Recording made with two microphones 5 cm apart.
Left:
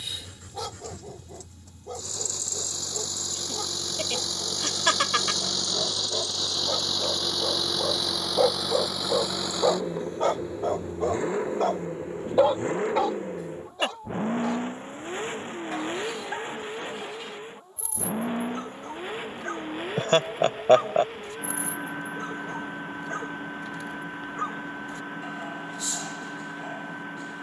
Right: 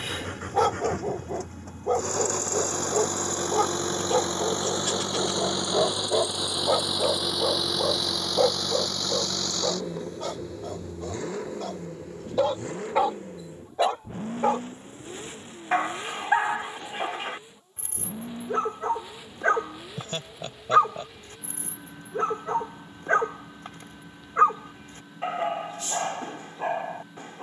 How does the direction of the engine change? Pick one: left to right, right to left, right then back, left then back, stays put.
right to left.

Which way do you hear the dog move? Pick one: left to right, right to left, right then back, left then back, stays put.
left then back.